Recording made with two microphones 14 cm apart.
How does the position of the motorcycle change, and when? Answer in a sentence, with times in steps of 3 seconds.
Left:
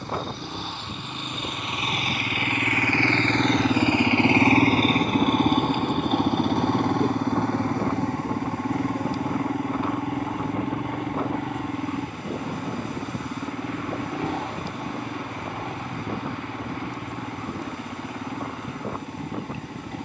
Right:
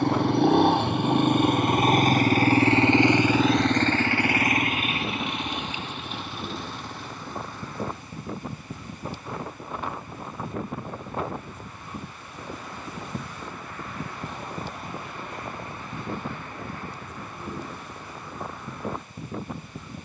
In this clip you hear the motorcycle on the right from 0 s and on the left from 3 s.